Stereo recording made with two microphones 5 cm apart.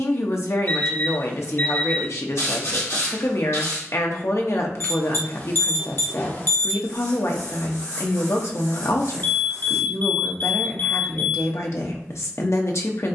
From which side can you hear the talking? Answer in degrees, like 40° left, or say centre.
60° left.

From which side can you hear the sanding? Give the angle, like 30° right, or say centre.
70° left.